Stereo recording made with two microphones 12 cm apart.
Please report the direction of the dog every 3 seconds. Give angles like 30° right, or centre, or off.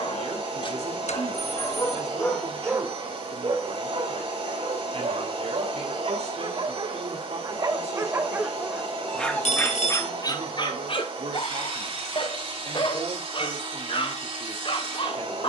20° left, 50° right, 30° right, 30° left, 40° left.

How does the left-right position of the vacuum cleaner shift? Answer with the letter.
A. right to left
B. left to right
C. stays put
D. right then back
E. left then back
C.